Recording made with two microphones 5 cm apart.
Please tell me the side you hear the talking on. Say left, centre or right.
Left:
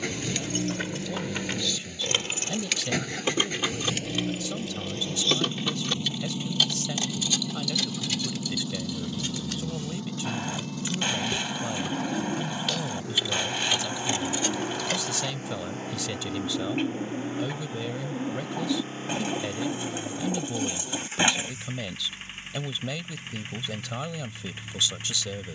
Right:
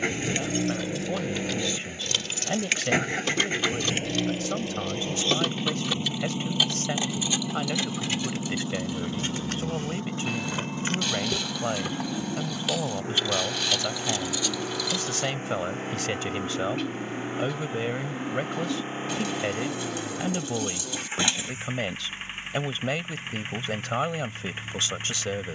right.